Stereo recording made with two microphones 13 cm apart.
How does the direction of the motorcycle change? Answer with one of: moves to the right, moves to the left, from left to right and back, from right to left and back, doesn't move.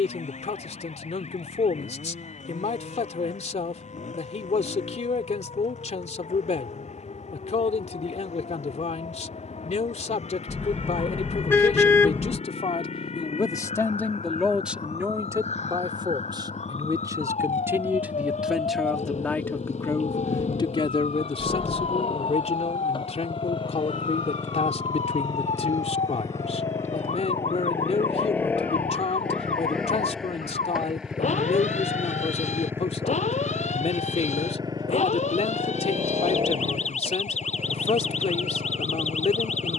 moves to the right.